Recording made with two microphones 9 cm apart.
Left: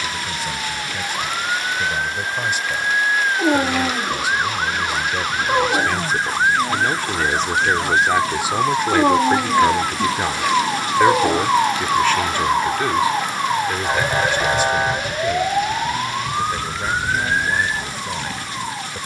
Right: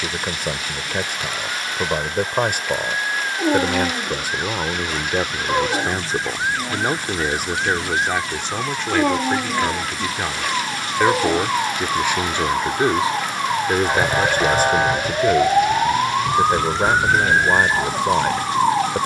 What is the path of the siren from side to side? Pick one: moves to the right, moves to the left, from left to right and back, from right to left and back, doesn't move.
moves to the right.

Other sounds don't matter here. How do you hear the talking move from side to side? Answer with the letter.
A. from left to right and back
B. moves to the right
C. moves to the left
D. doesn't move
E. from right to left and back
E.